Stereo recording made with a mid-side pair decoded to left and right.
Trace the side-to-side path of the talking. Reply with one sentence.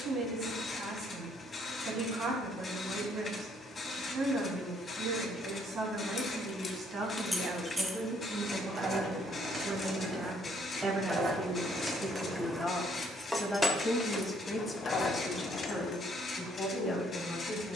You can hear the talking move from right to left.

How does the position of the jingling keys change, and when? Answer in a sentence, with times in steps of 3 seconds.
You can hear the jingling keys not at all from 0 s, in the centre from 6 s, on the right from 9 s, in the centre from 12 s and on the left from 15 s.